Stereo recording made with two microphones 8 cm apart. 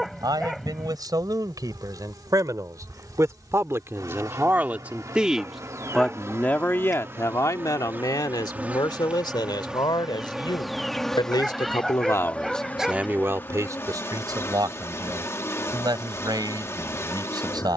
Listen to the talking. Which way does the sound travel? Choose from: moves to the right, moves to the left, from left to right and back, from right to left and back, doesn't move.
from right to left and back.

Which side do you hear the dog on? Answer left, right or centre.
centre.